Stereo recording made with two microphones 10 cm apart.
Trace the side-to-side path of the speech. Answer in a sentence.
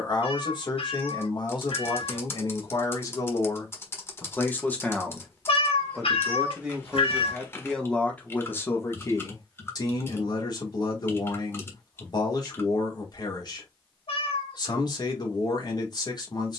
You can hear the speech go right and come back.